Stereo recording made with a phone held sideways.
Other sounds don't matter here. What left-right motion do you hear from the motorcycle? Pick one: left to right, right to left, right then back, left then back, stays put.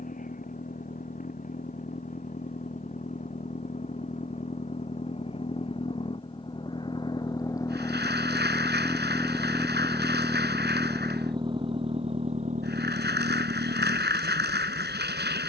left to right.